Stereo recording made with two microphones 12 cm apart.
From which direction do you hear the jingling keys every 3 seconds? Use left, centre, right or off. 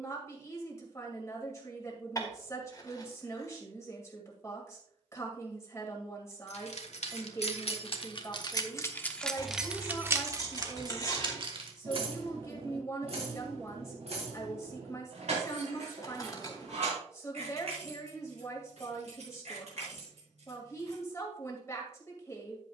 off, off, left, right, right, right, right, off.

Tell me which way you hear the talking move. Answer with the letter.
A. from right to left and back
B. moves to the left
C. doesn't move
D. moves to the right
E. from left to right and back
C.